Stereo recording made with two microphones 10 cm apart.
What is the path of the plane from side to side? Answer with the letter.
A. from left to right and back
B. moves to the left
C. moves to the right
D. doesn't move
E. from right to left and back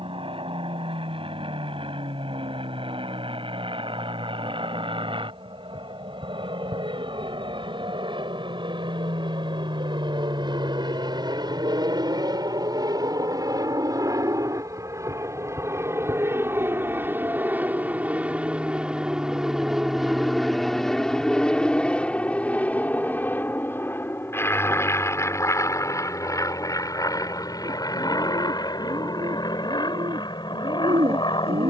B.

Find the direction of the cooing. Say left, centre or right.
right.